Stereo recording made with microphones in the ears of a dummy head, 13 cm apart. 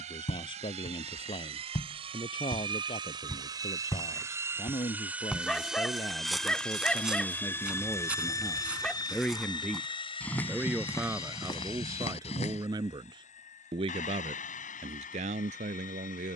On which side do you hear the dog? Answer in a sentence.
You can hear the dog in the centre.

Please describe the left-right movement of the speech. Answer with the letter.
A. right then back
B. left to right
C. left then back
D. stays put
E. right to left
B.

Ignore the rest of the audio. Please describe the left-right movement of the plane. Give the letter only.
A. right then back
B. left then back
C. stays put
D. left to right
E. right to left
E.